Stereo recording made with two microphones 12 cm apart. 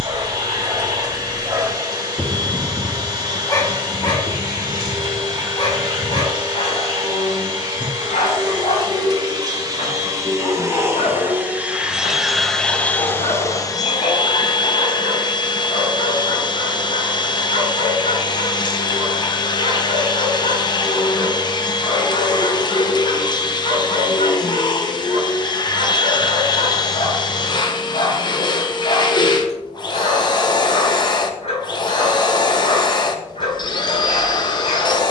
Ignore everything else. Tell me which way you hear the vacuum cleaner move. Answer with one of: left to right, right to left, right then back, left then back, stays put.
right to left.